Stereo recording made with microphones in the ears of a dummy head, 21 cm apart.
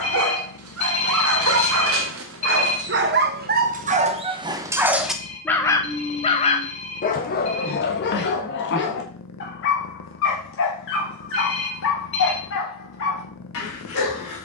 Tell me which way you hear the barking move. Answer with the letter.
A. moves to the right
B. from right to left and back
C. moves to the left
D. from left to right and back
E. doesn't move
C.